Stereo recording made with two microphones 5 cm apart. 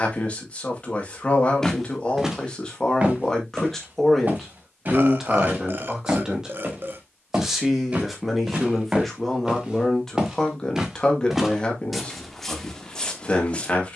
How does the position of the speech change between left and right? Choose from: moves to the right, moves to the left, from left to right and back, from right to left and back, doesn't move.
from left to right and back.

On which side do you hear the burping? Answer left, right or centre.
right.